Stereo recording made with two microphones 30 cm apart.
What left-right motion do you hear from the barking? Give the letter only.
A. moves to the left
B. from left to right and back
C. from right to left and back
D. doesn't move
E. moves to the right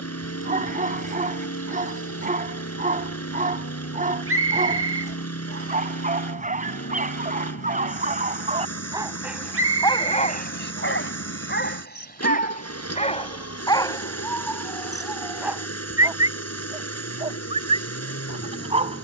C.